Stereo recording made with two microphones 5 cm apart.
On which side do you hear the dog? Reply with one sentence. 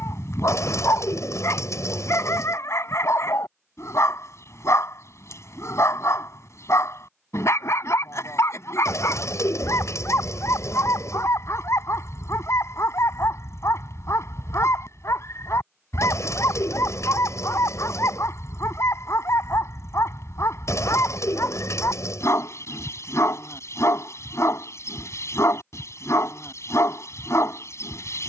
In this clip you hear the dog on the left.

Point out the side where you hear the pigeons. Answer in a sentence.
You can hear the pigeons on the left.